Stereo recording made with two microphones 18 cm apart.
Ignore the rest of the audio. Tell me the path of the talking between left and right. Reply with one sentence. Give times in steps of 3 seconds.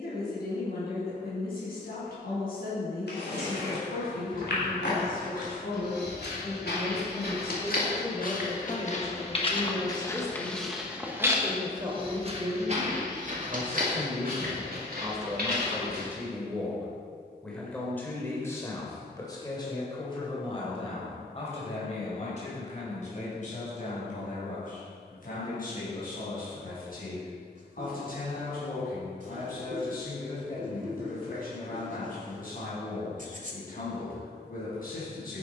You can hear the talking on the left from 0 s, in the centre from 9 s, on the right from 12 s, in the centre from 15 s and on the left from 18 s.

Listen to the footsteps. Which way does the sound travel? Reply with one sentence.
You can hear the footsteps go from the left side to the right.